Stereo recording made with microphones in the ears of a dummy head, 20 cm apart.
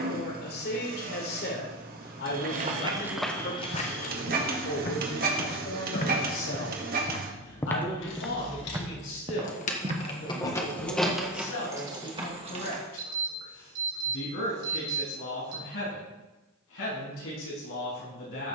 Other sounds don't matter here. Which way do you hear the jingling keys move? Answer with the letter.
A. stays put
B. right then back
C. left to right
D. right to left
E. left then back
C.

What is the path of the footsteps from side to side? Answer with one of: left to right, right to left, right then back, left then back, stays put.
left then back.